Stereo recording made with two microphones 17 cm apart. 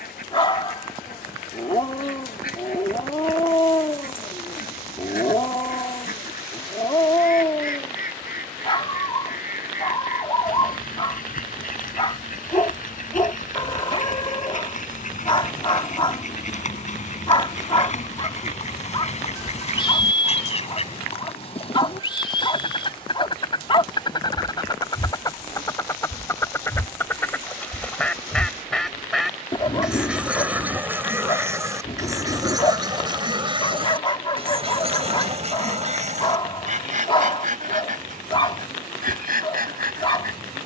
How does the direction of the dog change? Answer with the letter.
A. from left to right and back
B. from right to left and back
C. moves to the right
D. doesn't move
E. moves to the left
D.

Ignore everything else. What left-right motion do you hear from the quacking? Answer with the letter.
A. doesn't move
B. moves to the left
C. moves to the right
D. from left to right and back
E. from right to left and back
C.